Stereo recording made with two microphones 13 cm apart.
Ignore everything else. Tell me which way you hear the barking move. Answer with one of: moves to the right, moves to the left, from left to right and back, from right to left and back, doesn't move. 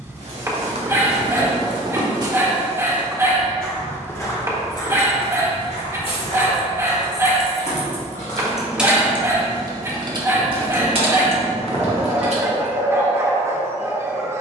doesn't move.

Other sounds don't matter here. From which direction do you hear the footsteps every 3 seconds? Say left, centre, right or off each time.
right, left, left, off, off.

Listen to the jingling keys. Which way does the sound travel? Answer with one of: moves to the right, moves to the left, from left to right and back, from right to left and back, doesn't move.
moves to the right.